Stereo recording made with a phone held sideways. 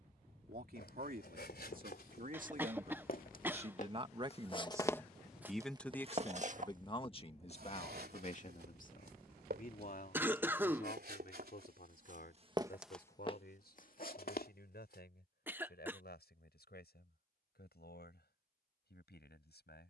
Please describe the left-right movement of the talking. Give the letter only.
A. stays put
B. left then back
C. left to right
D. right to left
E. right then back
D.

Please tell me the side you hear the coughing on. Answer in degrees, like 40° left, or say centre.
10° right.